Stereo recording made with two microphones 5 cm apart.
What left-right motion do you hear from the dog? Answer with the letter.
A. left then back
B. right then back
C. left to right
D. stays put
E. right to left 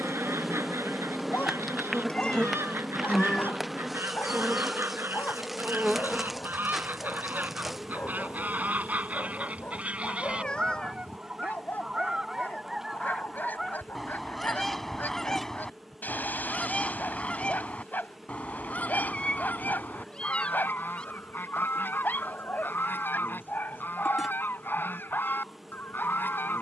D.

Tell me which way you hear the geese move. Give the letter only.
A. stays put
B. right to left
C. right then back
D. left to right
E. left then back
B.